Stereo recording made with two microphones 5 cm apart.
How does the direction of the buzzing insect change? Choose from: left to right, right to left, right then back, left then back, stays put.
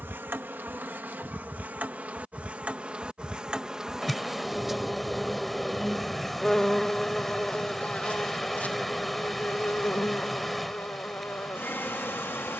right to left.